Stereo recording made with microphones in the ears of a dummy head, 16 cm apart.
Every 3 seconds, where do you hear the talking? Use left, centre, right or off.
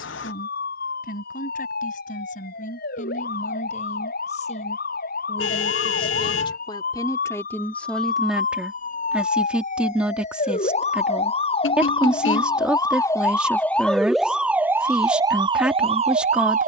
left, left, centre, centre, centre, centre.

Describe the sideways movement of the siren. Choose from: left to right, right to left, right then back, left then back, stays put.
left to right.